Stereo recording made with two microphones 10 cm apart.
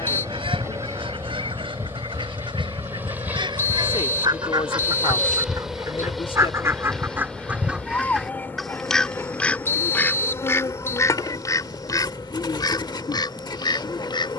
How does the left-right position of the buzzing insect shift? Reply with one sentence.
In this clip you hear the buzzing insect move to the left.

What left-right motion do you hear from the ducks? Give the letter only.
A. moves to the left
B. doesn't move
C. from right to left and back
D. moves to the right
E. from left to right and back
A.